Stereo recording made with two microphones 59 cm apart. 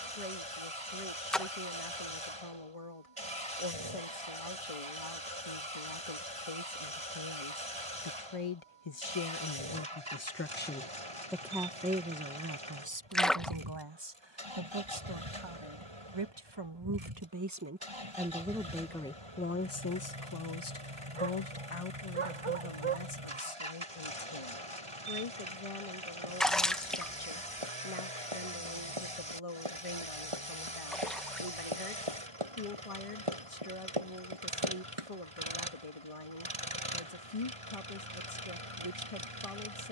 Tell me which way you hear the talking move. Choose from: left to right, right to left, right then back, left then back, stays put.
right then back.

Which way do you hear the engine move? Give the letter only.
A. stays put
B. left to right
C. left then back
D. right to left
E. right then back
A.